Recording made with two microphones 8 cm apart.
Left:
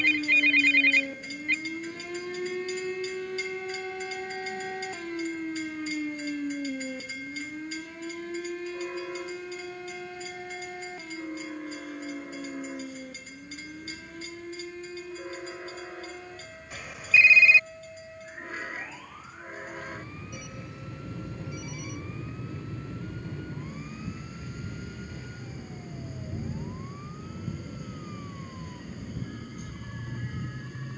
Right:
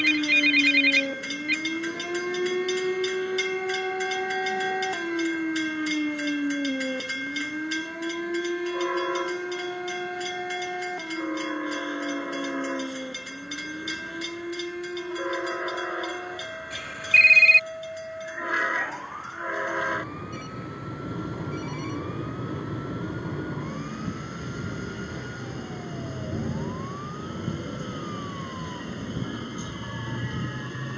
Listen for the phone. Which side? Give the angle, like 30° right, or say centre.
10° left.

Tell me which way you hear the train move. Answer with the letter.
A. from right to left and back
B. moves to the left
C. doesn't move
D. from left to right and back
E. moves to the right
C.